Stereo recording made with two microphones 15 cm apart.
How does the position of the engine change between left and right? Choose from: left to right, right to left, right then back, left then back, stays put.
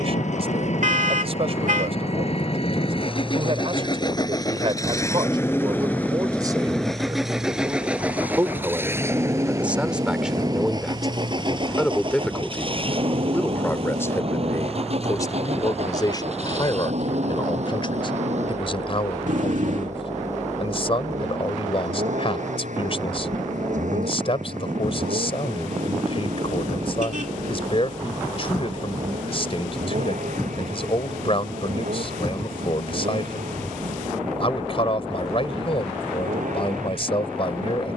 left to right.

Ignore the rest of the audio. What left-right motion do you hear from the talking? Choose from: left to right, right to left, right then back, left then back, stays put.
right to left.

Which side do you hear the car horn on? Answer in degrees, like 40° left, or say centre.
60° right.